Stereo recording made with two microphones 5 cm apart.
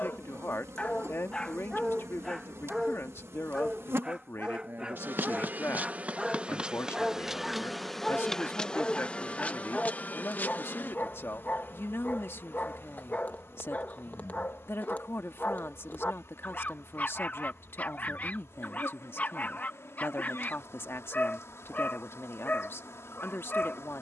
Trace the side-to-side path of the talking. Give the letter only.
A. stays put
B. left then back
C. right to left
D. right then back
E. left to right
A.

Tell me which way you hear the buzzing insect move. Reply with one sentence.
You can hear the buzzing insect move from right to left.